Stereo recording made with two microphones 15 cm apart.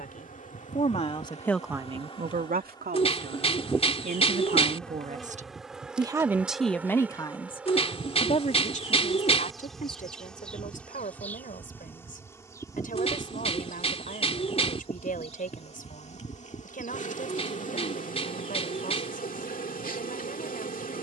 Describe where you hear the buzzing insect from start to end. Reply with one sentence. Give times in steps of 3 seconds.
You can hear the buzzing insect on the left from 0 s, in the centre from 3 s and on the left from 12 s.